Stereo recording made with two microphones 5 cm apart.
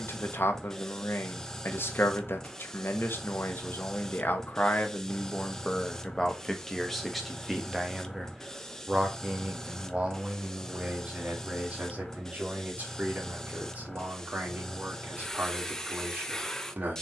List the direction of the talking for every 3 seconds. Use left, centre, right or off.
left, left, centre, right, right, right.